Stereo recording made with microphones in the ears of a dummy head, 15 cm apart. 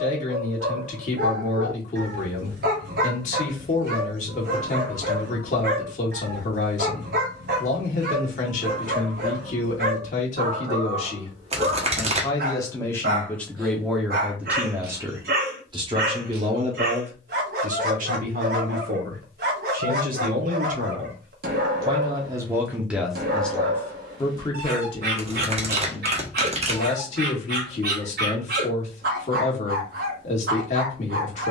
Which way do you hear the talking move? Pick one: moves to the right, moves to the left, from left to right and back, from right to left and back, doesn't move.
from left to right and back.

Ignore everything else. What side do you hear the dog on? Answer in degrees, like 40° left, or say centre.
60° right.